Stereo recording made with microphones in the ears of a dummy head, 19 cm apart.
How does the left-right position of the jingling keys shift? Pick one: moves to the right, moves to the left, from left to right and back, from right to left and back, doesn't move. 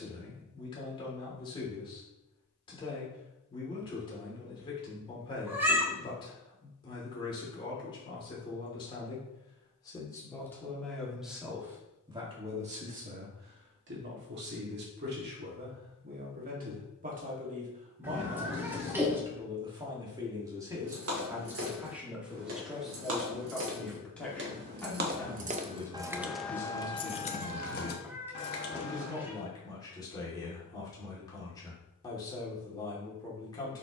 moves to the left.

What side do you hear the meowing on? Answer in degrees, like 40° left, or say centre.
10° right.